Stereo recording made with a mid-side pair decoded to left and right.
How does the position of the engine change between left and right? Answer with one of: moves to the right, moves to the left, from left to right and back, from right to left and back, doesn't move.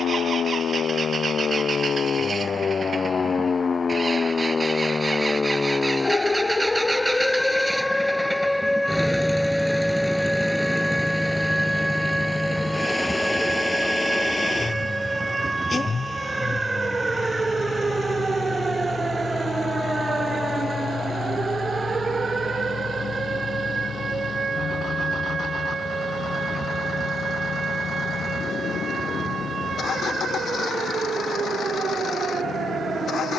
moves to the left.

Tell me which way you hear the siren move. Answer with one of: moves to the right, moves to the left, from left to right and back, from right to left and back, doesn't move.
moves to the right.